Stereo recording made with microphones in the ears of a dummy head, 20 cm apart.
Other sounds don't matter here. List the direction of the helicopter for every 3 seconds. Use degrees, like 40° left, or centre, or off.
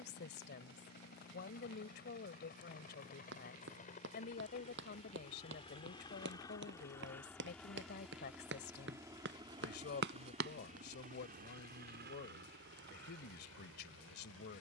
50° left, 30° left, 10° left, 30° right, 60° right.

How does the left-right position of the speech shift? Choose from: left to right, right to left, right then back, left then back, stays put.
stays put.